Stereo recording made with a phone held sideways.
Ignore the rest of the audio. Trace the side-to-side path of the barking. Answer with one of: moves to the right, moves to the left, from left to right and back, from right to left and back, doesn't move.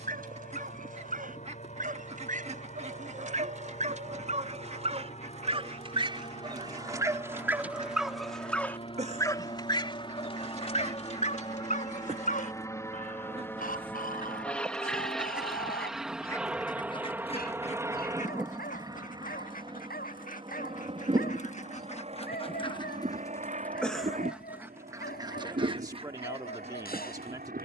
moves to the left.